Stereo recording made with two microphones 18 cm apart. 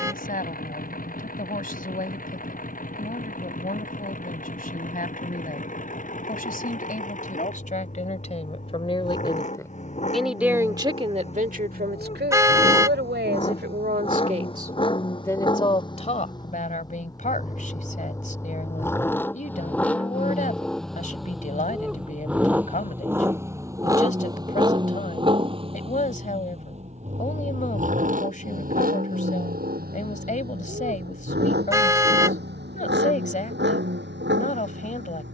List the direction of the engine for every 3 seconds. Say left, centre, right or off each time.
left, left, left, left, left, left, centre, centre, right, right, right, right.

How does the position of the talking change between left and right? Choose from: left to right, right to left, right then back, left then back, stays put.
right then back.